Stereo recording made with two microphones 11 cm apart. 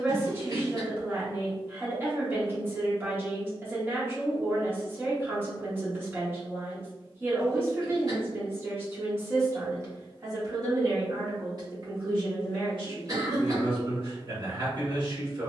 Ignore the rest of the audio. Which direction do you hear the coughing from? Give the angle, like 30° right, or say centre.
40° right.